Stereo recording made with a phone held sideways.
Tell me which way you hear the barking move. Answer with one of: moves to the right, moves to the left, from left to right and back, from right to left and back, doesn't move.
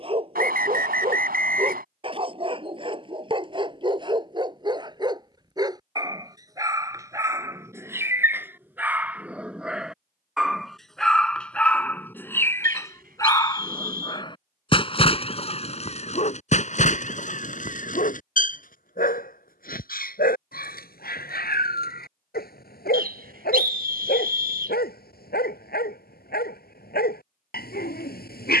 moves to the left.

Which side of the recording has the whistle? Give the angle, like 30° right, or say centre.
70° right.